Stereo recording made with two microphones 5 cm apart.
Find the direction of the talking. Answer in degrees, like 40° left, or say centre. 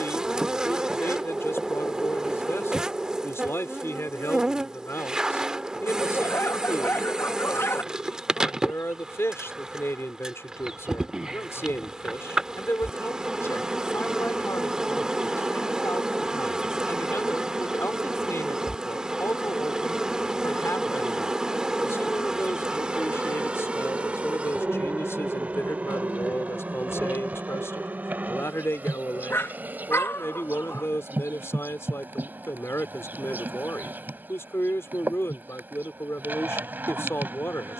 60° left.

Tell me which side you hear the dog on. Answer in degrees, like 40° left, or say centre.
50° left.